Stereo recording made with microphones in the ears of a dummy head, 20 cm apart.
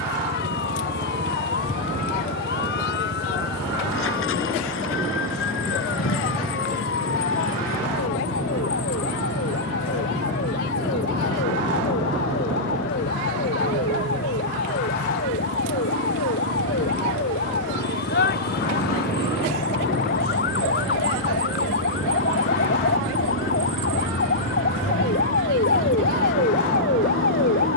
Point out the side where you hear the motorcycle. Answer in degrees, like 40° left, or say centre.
70° left.